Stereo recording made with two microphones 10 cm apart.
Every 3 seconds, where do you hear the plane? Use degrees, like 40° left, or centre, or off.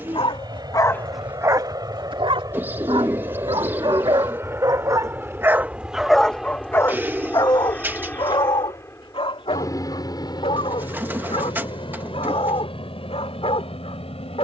40° right, 20° right, 10° left, 40° left, 60° left.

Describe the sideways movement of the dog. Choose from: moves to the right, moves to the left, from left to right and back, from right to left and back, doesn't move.
from left to right and back.